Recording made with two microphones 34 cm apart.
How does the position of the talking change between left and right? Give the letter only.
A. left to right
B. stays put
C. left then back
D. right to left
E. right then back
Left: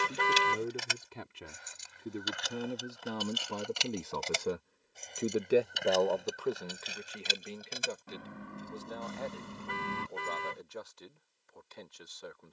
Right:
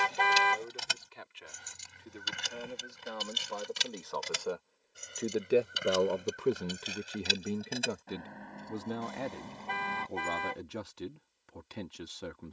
A.